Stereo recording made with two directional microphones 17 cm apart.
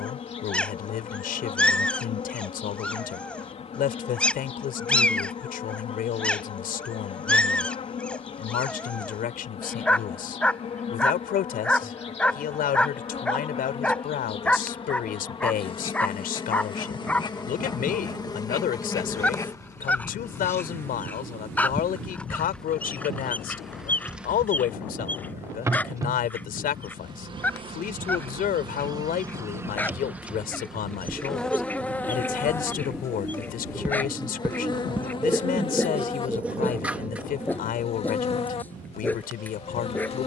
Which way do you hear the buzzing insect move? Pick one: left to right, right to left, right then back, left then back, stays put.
right then back.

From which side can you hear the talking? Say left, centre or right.
left.